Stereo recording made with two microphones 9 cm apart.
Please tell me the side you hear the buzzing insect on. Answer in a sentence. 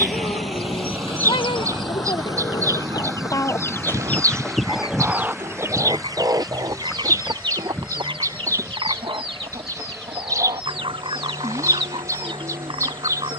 In this clip you hear the buzzing insect on the right.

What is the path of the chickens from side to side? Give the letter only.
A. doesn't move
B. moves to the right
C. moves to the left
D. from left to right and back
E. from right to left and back
B.